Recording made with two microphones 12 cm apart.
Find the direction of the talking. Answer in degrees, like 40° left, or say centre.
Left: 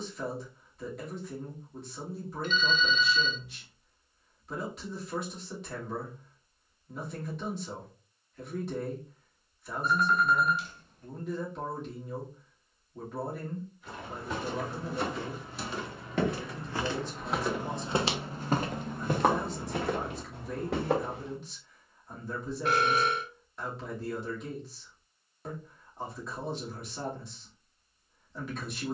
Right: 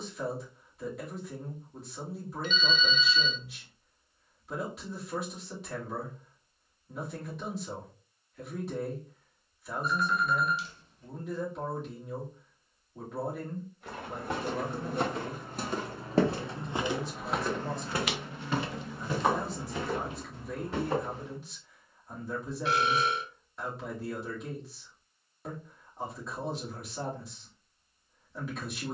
centre.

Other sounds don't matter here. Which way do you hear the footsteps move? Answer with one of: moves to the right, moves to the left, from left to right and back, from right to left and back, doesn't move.
moves to the left.